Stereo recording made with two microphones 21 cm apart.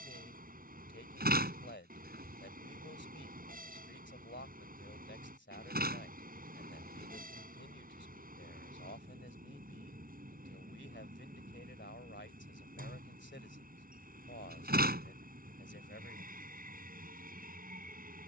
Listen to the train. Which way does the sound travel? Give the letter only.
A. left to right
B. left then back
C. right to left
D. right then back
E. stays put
E.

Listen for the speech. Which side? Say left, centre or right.
left.